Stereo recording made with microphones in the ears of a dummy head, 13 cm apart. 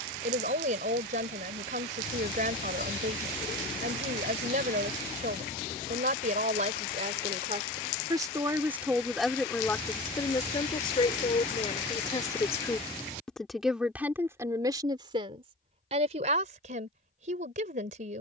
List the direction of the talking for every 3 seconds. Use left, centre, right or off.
right, right, right, left, centre, right.